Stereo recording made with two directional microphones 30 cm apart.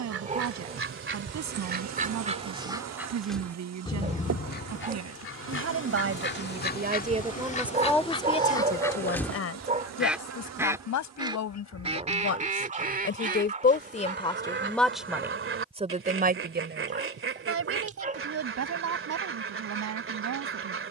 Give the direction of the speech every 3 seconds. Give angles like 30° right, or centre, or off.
60° right, 60° right, 10° right, 60° left, 30° left, 30° right, 60° right.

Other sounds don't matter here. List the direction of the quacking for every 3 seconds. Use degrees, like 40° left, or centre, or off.
30° right, 30° left, 20° left, 10° right, 30° right, 40° right, 40° right.